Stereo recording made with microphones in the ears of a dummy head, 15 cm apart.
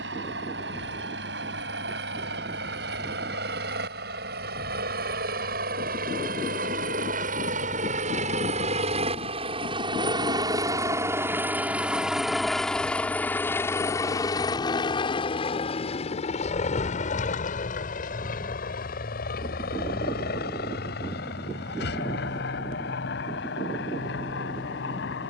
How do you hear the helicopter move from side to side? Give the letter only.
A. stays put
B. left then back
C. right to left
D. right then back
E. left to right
C.